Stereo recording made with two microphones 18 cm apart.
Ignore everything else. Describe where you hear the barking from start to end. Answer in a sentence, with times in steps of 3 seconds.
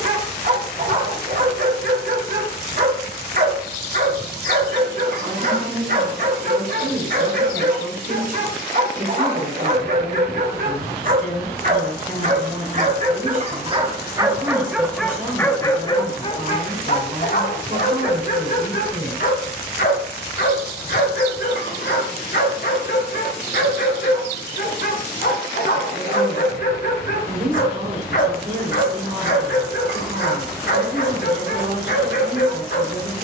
You can hear the barking on the right from 0 s and on the left from 15 s.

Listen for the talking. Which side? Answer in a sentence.
You can hear the talking on the right.